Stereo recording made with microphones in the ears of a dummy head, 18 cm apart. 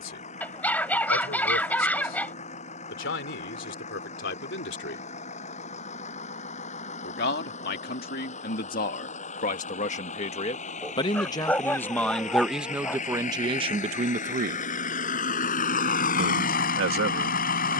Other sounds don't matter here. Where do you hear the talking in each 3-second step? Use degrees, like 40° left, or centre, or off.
60° left, 60° left, 50° left, 30° left, 20° right, 70° right.